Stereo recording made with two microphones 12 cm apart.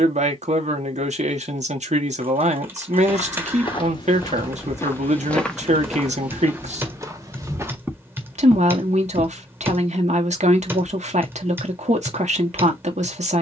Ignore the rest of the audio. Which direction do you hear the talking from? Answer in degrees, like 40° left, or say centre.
70° right.